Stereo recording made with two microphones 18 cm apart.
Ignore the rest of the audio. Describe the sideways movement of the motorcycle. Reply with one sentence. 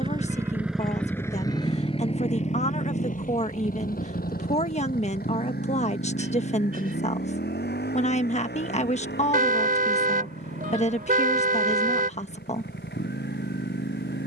You can hear the motorcycle go from the right side to the left.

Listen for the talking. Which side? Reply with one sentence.
You can hear the talking on the left.